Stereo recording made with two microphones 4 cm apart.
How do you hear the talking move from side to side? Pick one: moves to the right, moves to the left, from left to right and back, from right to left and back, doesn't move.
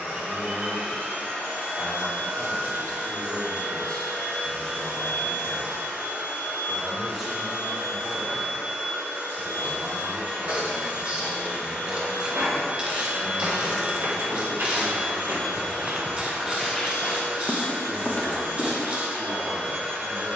moves to the right.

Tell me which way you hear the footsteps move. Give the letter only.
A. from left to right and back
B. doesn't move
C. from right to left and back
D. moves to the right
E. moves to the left
E.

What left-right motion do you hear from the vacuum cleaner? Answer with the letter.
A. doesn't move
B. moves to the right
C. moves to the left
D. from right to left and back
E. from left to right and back
A.